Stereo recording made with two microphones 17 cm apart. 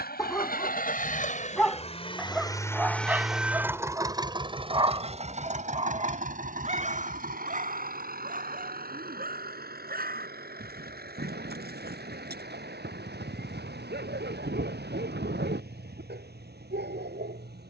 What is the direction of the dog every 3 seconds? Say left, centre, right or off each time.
centre, right, right, right, right, right.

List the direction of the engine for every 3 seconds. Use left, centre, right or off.
left, right, right, right, right, right.